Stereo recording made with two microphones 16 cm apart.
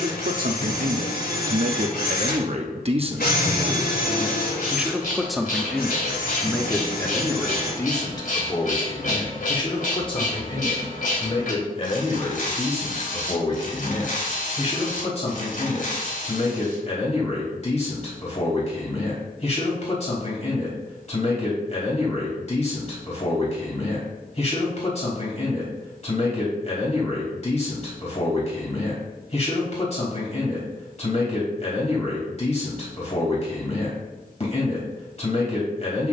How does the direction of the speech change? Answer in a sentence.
In this clip you hear the speech travel towards the left.